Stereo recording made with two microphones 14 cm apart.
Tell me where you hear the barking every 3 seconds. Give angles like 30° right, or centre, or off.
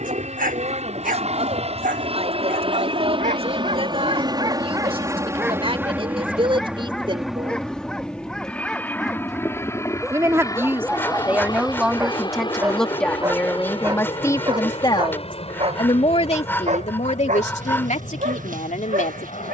80° right, 40° right, centre, centre, 20° right, 60° right, 80° right.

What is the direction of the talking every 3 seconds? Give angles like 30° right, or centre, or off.
50° right, 40° right, 40° right, 10° right, 10° left, 50° left, 70° left.